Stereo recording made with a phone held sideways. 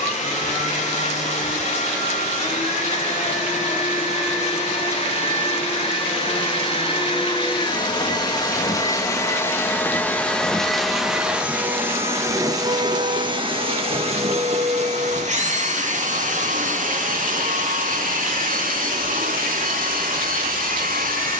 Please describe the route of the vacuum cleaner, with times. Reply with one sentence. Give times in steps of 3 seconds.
You can hear the vacuum cleaner on the left from 0 s, in the centre from 9 s and on the right from 12 s.